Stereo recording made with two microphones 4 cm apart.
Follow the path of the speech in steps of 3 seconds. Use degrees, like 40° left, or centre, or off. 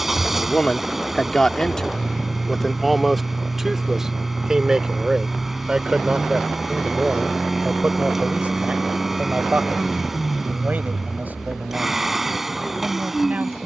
20° left, 10° right, 30° right, 40° right, 50° right.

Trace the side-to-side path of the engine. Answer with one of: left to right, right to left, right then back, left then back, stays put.
stays put.